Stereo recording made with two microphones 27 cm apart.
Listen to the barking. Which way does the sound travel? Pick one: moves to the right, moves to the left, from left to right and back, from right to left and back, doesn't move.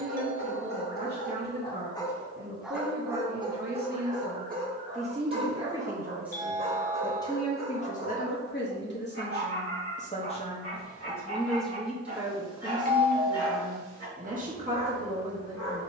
moves to the right.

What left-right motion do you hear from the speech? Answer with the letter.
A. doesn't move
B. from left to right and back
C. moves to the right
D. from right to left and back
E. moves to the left
D.